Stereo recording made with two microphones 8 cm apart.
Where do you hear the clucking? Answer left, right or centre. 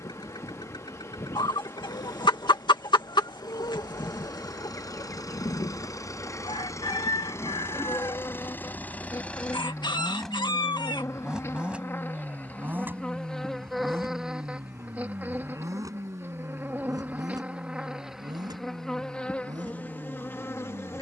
left.